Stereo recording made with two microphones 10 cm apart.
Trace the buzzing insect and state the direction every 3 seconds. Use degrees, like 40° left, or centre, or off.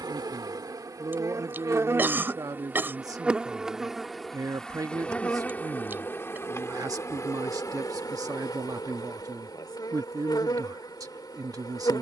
30° right, centre, 30° left, 40° left.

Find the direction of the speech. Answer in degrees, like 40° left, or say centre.
40° right.